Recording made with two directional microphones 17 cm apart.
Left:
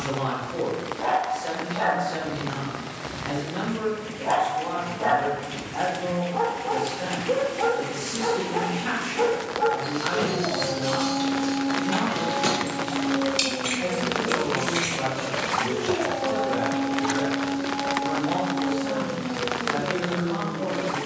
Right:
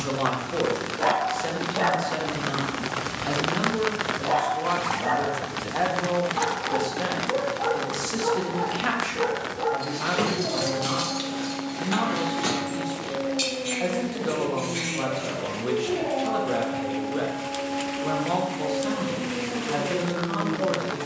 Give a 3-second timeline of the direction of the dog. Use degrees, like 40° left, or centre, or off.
20° right, 40° left, 60° left, 40° left, centre, 20° right, 20° right.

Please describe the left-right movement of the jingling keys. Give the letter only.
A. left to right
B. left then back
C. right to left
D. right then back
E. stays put
C.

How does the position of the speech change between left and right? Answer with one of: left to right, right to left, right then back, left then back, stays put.
stays put.